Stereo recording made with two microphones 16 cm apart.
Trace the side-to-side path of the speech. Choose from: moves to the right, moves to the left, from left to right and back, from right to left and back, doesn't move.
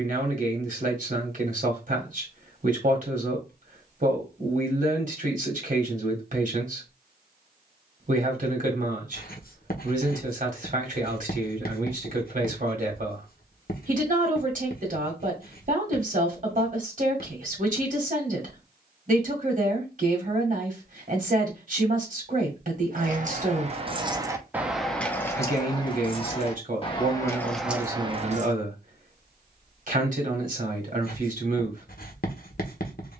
doesn't move.